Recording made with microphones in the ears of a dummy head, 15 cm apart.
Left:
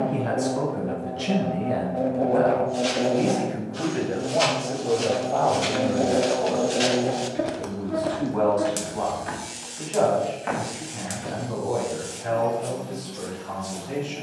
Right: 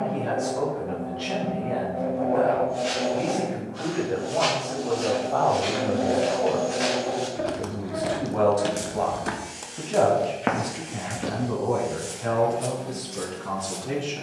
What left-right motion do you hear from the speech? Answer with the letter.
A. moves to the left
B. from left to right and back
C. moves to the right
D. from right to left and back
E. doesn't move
C.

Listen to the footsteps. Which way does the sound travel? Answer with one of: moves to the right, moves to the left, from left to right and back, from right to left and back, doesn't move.
moves to the right.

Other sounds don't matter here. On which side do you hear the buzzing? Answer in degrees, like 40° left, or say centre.
40° left.